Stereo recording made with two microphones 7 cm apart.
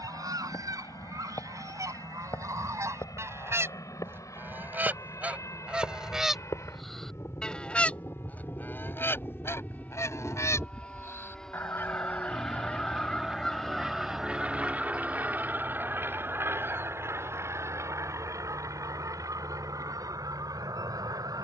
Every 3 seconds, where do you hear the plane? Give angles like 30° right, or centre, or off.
60° left, 50° left, 40° left, 20° left, 10° right, 30° right, 50° right.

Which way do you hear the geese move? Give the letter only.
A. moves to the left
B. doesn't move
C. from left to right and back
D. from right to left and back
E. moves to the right
D.